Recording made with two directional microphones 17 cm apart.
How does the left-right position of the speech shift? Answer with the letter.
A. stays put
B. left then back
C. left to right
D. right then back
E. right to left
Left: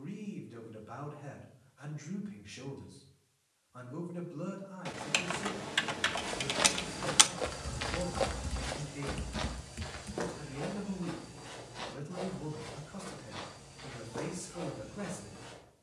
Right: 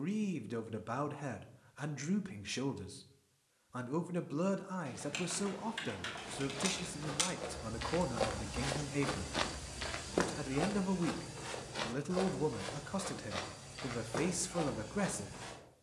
A.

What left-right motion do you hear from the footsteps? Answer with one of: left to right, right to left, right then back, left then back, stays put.
left to right.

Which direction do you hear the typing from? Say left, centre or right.
left.